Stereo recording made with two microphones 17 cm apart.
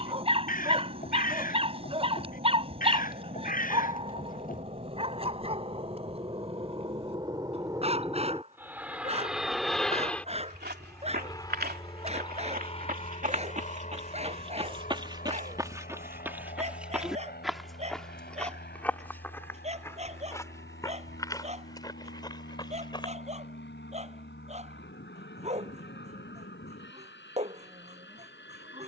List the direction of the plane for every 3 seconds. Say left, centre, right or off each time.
right, right, right, centre, left, left, left, left, left, left.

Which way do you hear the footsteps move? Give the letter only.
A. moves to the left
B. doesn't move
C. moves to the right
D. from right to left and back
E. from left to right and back
A.